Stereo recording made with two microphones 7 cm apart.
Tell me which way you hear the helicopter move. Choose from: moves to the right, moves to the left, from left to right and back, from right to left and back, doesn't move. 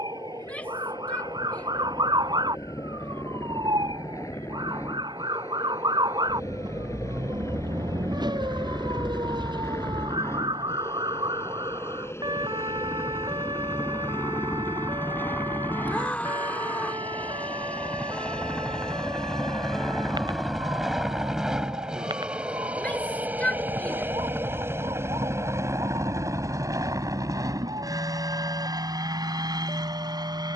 moves to the right.